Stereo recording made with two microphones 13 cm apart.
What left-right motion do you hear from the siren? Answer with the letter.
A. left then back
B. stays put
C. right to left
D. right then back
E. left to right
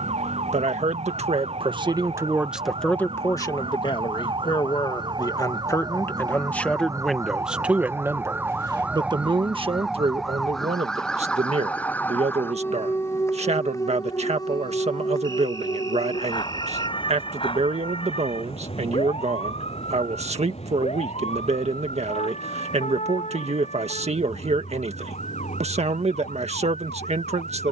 C.